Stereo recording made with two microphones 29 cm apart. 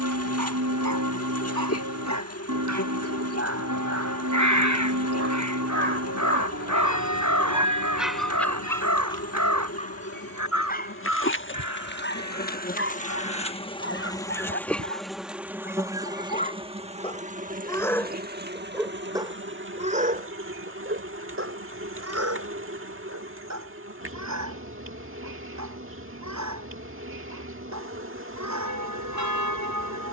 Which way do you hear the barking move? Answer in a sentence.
In this clip you hear the barking go left and come back.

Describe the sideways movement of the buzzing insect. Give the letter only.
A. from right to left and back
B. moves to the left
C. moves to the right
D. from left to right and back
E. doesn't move
C.